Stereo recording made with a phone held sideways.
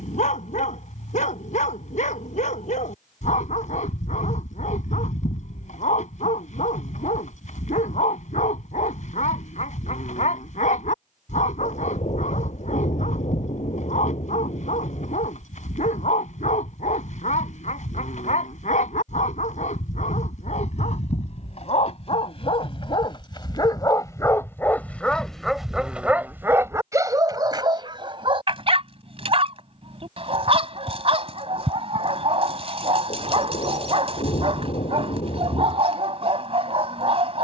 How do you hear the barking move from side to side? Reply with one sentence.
In this clip you hear the barking move from left to right.